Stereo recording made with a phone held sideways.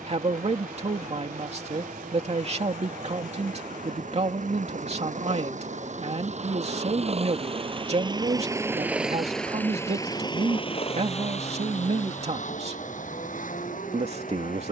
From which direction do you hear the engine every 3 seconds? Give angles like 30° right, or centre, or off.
80° right, 70° right, 40° right, 30° left, 70° left.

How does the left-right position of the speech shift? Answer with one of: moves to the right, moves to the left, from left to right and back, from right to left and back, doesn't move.
doesn't move.